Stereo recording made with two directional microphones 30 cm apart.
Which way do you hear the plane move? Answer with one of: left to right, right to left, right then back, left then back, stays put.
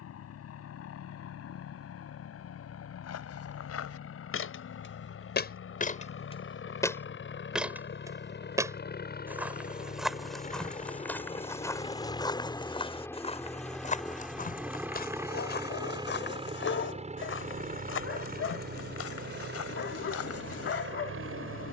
left to right.